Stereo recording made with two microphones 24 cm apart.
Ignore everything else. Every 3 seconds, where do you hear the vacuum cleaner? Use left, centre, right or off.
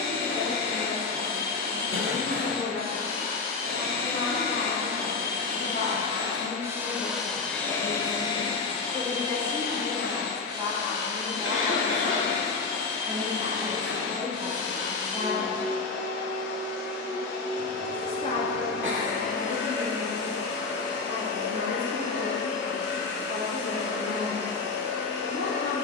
right, right, centre, left, left, left, left, left, left.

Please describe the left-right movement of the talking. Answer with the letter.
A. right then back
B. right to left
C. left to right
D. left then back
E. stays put
A.